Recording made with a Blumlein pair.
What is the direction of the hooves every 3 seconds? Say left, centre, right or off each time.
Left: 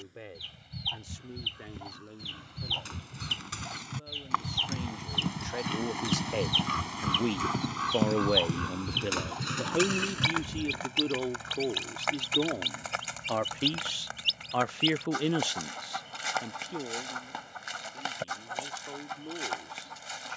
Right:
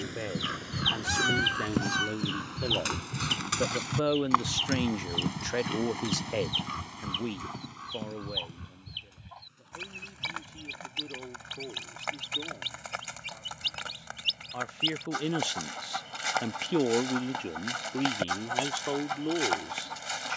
right, centre, left, left, off, off, off.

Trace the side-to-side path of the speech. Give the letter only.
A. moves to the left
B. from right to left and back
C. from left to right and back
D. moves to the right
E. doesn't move
B.